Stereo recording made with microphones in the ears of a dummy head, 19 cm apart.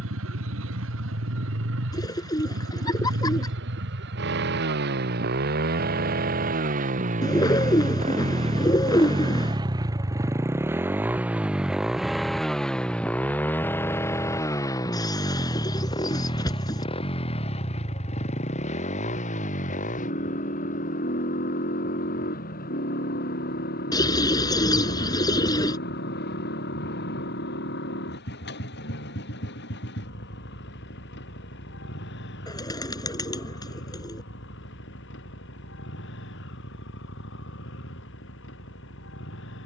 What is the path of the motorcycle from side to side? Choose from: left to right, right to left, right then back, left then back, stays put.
right to left.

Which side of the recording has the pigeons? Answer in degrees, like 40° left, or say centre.
20° left.